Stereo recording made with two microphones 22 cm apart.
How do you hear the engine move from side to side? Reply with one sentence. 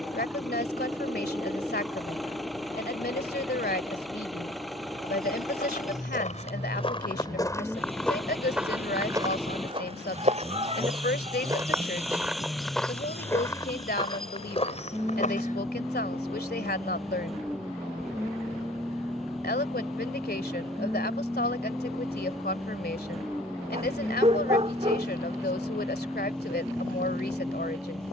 In this clip you hear the engine stay put.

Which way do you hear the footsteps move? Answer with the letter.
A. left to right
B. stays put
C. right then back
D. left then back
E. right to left
C.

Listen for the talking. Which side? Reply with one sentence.
You can hear the talking on the left.